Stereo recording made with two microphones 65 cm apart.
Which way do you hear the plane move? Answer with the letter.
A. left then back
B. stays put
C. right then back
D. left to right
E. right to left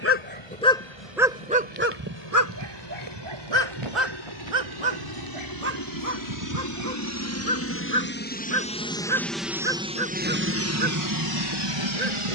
D.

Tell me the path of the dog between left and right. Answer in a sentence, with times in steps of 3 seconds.
In this clip you hear the dog in the centre from 0 s and on the right from 3 s.